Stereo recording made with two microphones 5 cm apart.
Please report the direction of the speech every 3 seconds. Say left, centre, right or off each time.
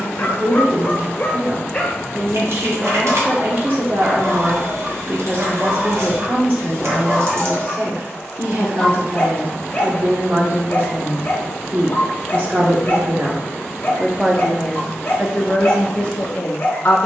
right, right, right, right, right, left.